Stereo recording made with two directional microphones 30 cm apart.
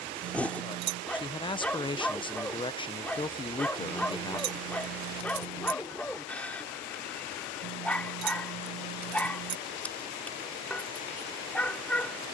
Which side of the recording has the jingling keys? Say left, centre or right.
right.